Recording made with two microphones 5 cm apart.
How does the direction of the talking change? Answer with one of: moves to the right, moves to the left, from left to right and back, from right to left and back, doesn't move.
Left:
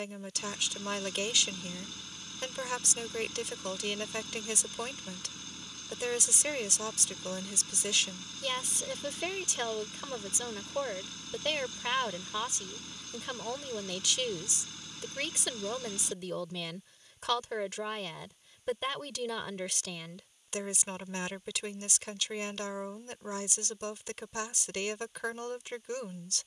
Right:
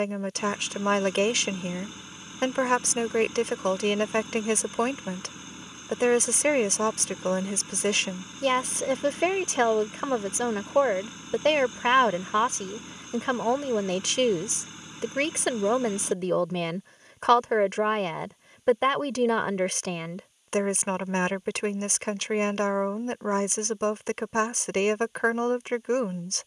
doesn't move.